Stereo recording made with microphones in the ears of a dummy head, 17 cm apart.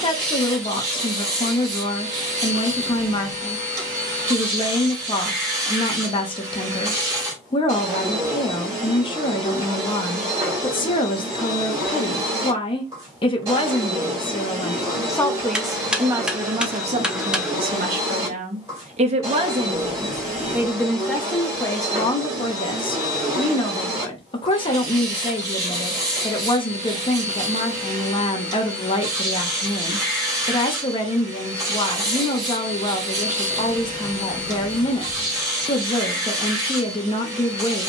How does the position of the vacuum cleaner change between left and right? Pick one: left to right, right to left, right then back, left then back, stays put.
stays put.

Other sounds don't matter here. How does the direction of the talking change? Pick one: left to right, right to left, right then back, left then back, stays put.
right then back.